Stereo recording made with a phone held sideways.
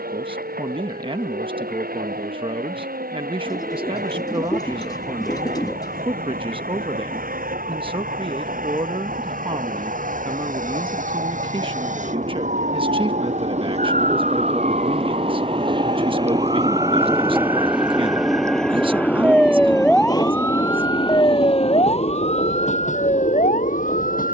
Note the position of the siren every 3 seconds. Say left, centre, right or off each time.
right, right, right, right, right, right, centre, left.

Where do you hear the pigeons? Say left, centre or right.
left.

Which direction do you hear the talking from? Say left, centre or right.
right.